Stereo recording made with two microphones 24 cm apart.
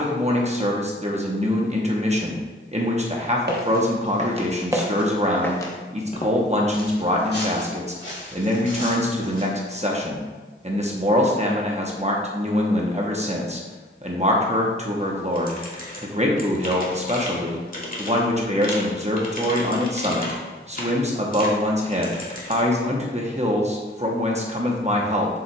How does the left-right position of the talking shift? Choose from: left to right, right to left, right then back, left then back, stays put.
stays put.